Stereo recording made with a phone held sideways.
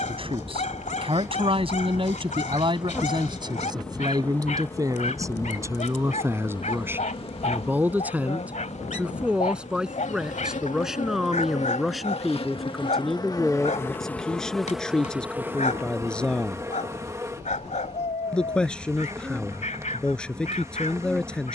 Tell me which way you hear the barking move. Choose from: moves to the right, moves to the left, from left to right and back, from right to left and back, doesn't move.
doesn't move.